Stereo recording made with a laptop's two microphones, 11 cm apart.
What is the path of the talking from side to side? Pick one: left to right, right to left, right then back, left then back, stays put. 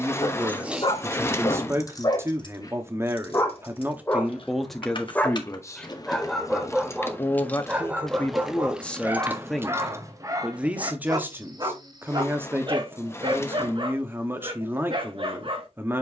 left then back.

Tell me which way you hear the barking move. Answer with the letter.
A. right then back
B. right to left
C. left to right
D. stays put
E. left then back
C.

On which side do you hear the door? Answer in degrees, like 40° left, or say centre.
20° left.